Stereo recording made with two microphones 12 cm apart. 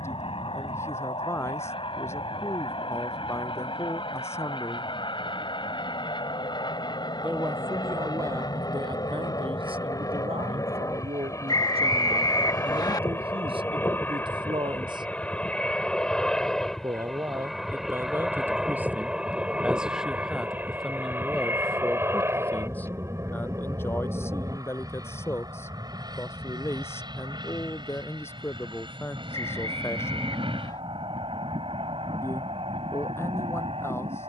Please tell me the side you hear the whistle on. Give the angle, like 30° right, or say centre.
40° left.